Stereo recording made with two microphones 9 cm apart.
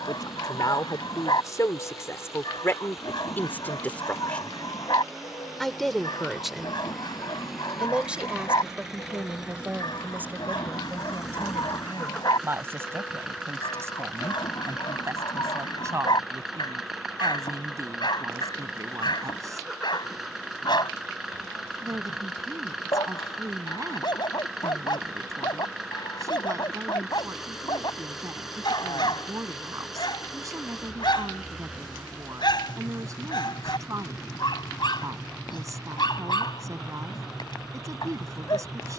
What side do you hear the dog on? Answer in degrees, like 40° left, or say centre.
60° left.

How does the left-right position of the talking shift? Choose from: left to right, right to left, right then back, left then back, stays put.
left to right.